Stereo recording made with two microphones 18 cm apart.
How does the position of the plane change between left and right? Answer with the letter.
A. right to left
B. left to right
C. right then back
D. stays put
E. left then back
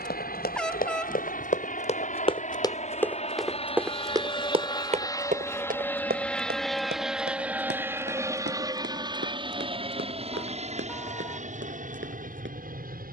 B.